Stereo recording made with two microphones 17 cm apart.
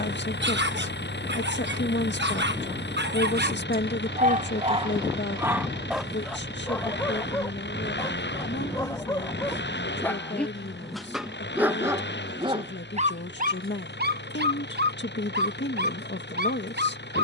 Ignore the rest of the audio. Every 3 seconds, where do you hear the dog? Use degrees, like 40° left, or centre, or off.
80° right, 40° right, 10° left, centre, 50° right, 70° right.